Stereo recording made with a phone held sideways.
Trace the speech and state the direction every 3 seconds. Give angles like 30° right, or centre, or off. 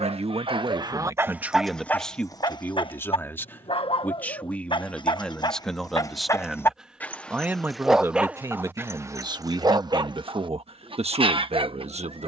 20° right, 10° left, 10° right, 50° right.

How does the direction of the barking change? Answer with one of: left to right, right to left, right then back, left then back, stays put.
left then back.